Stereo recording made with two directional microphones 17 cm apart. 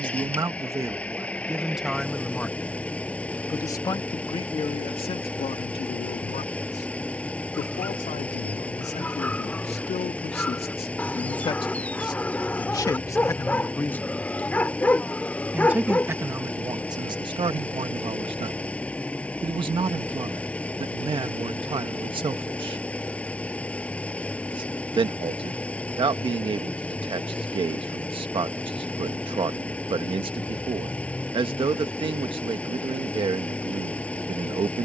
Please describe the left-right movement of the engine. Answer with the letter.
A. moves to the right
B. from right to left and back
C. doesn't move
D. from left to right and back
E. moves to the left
C.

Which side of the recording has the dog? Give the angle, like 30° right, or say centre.
10° left.